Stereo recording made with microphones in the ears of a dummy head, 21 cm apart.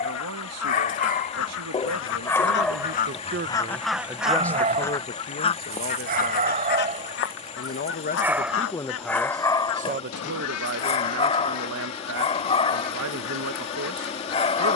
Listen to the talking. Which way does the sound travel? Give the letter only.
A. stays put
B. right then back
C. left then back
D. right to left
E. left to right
C.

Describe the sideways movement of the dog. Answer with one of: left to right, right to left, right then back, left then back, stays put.
right then back.